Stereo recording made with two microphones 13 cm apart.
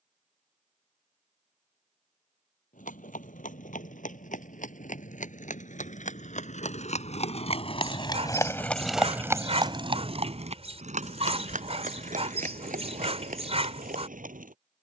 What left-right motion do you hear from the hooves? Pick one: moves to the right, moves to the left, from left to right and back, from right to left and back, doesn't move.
moves to the right.